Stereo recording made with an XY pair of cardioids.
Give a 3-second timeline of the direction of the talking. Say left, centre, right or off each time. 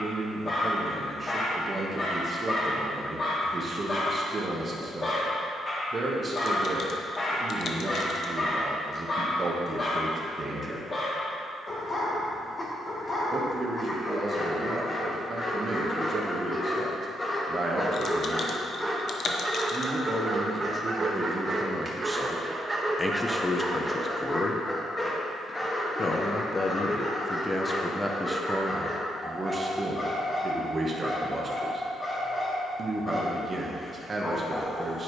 right, right, right, right, right, right, right, centre, left, centre, right, right.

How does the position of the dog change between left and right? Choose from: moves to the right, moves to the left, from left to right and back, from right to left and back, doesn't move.
from left to right and back.